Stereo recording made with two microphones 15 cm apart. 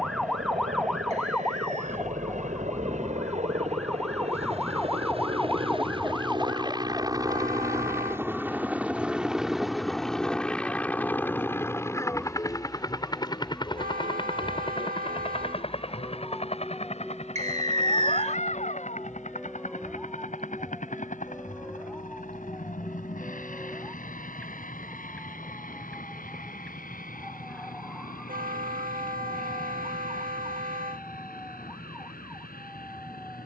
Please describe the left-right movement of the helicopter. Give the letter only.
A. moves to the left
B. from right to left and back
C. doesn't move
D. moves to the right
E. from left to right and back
A.